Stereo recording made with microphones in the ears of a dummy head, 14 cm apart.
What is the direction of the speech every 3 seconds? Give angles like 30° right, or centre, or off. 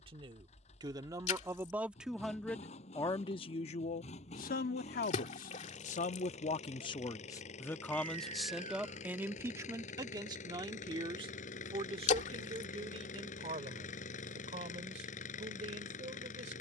10° right, 50° left, 20° left, 20° right, 40° right, 50° right.